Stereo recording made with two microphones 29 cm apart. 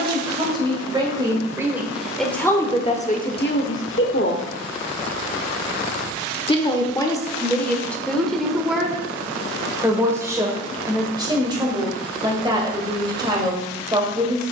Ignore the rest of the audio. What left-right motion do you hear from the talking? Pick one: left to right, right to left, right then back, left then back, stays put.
left then back.